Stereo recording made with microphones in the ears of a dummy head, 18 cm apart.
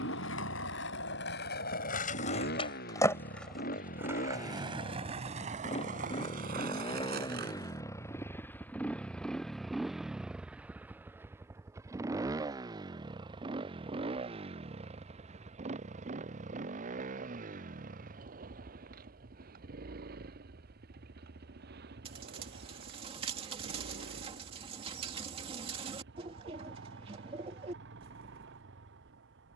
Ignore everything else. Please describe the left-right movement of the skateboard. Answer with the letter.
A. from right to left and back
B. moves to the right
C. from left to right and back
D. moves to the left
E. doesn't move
B.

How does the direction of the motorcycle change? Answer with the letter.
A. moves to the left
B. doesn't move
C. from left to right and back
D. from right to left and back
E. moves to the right
E.